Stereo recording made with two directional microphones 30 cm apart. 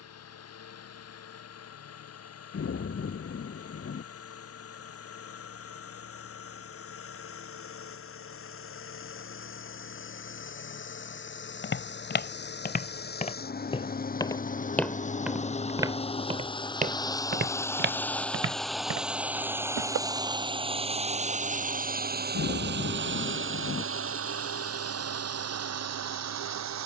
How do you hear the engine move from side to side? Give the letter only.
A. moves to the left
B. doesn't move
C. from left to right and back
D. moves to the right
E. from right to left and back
D.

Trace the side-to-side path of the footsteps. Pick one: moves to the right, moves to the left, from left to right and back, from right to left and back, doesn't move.
moves to the right.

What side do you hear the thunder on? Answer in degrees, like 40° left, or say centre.
40° left.